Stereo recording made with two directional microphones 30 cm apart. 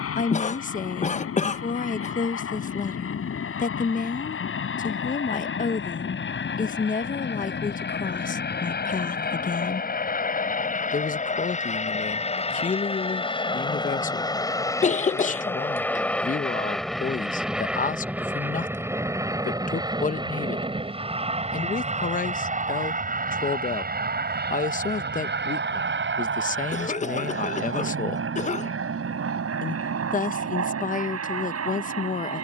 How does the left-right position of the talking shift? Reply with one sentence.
In this clip you hear the talking stay in one place.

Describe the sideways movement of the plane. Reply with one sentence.
In this clip you hear the plane travel towards the right.